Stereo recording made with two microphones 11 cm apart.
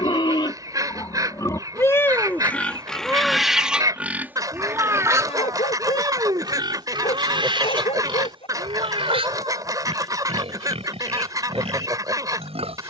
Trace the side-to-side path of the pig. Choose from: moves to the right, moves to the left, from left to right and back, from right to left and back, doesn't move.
moves to the right.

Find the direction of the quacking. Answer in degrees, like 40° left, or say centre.
30° right.